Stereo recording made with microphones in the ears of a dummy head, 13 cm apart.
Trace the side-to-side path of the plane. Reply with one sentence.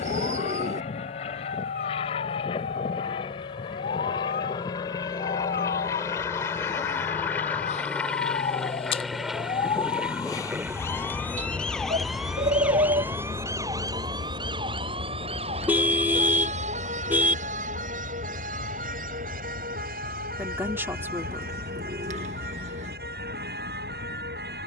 You can hear the plane move to the right.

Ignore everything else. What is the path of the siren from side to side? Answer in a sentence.
In this clip you hear the siren move from left to right.